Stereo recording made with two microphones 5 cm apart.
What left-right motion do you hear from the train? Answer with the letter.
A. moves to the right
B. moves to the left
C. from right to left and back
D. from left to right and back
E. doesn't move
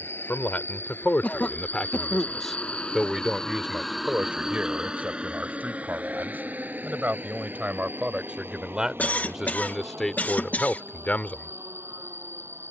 A.